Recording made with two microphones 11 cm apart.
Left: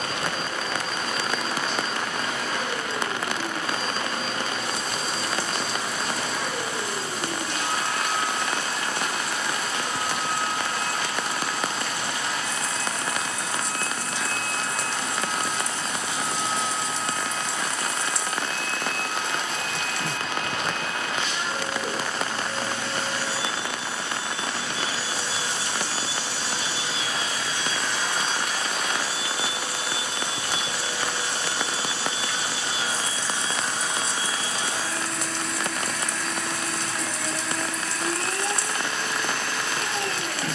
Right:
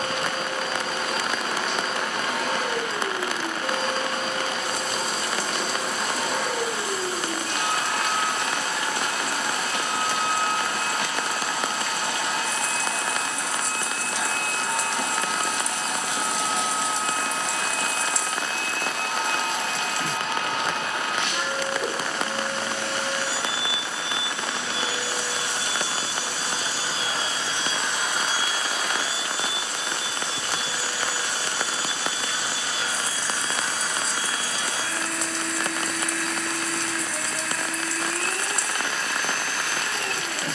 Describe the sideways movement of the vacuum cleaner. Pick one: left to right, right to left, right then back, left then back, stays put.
right to left.